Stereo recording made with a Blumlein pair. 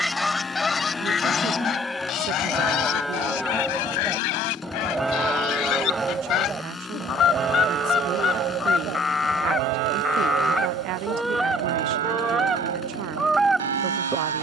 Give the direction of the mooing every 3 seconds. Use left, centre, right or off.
centre, centre, right, right, right.